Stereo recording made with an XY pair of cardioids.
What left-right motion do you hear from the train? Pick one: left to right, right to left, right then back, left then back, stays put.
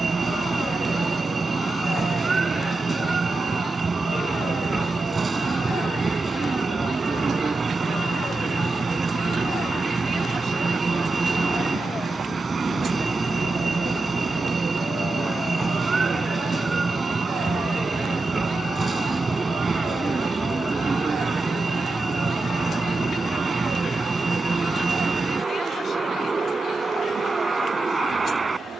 stays put.